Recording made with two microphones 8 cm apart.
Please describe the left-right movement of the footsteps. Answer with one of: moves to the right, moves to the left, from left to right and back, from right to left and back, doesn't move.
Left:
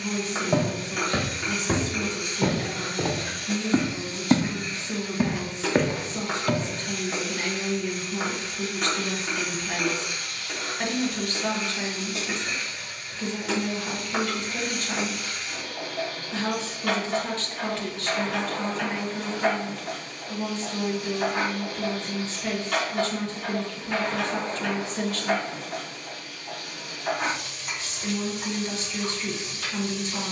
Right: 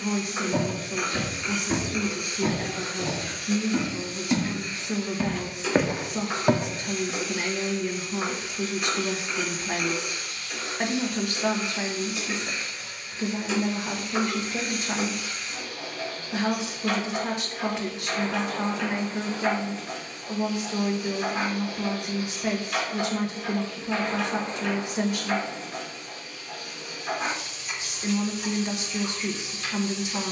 moves to the right.